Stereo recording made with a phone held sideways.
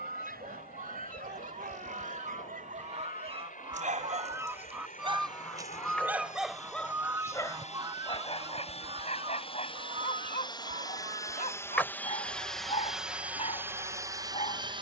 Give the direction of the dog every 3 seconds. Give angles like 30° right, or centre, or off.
70° right, 40° right, 20° left, 40° left, 40° left.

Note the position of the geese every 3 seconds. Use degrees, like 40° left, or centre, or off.
50° right, 20° right, 20° right, 50° right, 60° right.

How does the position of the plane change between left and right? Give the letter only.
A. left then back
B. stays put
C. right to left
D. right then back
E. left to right
E.